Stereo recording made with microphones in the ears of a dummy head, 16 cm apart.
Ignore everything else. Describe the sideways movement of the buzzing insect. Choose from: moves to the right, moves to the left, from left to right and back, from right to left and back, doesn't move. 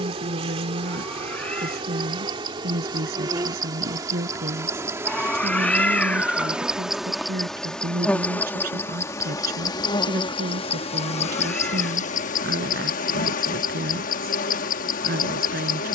moves to the left.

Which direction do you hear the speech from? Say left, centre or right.
right.